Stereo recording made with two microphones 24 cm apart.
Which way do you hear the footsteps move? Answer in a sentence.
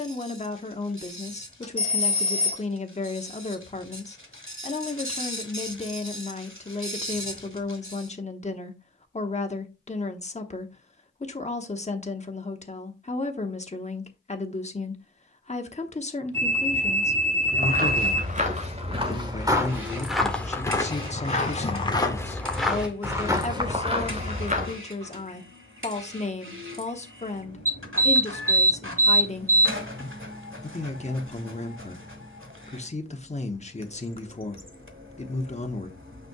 You can hear the footsteps go left and come back.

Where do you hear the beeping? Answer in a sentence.
In this clip you hear the beeping on the right.